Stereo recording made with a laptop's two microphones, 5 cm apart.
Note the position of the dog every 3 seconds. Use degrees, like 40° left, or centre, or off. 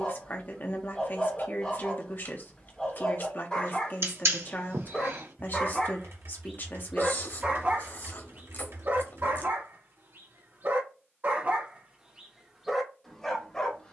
20° left, 20° left, 30° right, 50° right, 10° left.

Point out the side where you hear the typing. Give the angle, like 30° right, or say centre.
70° right.